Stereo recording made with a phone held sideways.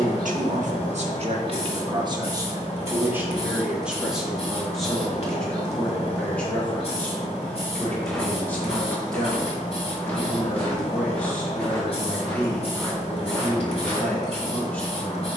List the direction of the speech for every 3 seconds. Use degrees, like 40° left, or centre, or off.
40° right, centre, 10° left, 10° left, 10° left.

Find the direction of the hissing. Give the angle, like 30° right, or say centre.
50° left.